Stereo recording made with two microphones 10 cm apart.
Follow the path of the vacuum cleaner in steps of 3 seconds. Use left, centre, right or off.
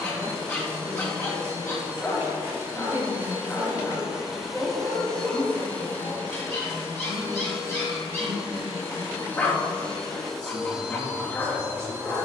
right, centre, left, centre.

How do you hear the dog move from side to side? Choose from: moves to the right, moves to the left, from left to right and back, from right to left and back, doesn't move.
doesn't move.